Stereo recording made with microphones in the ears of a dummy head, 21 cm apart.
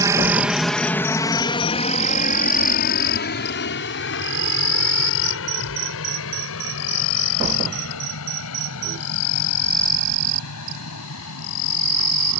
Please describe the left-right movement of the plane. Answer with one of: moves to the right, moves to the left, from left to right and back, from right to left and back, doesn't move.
moves to the left.